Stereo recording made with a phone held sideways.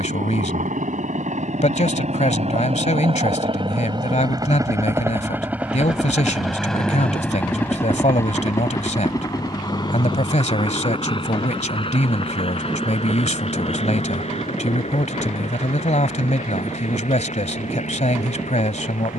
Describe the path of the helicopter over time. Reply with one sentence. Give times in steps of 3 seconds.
In this clip you hear the helicopter on the right from 0 s, in the centre from 6 s and on the left from 9 s.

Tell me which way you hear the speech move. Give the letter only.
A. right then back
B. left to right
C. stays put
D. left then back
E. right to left
C.